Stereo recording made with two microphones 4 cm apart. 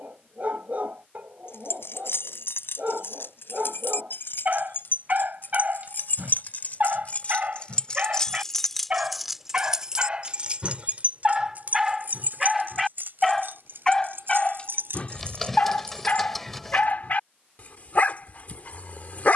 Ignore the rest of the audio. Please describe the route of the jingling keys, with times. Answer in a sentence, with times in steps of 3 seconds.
In this clip you hear the jingling keys on the left from 0 s, on the right from 9 s and not at all from 18 s.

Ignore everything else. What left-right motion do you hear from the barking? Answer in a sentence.
In this clip you hear the barking travel towards the left.